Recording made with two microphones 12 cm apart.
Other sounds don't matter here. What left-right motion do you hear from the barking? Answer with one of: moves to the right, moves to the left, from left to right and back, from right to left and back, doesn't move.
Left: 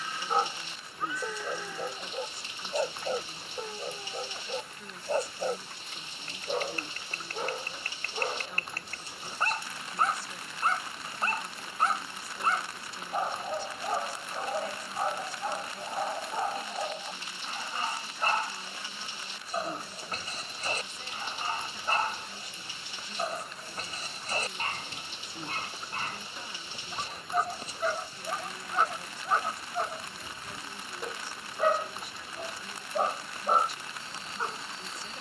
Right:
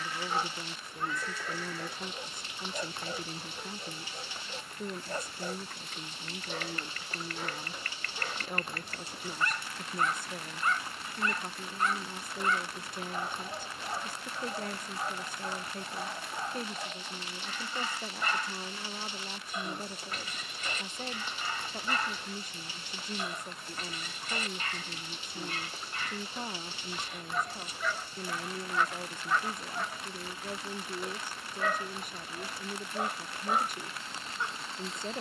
doesn't move.